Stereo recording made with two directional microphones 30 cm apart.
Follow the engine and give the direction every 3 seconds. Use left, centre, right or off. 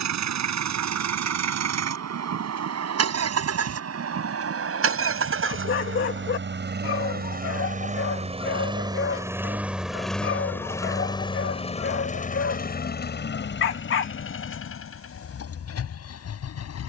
right, right, right, centre, left, left.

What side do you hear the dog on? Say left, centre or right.
left.